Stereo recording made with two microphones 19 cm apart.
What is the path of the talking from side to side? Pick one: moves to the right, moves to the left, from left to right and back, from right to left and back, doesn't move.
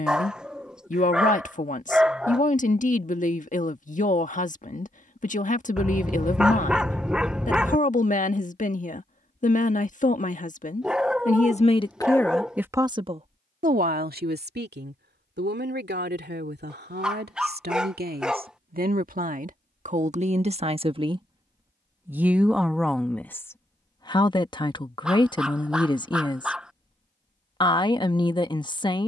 from left to right and back.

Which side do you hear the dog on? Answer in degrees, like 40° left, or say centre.
centre.